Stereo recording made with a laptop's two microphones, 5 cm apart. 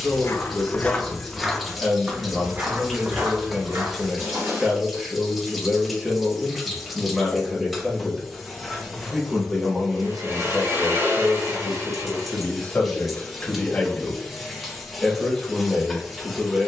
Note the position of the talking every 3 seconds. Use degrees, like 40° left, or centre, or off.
10° right, 10° right, 10° right, 10° left, 20° left, centre.